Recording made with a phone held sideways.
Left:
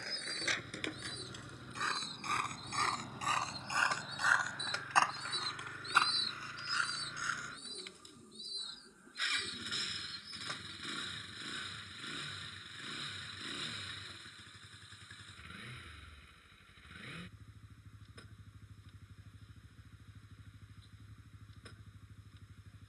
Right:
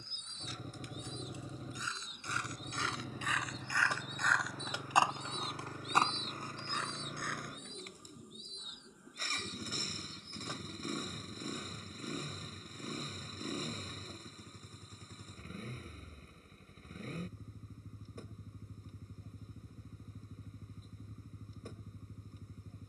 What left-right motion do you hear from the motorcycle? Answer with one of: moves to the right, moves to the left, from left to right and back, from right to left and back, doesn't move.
doesn't move.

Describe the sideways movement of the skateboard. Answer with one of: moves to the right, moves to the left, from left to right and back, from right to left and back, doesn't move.
moves to the right.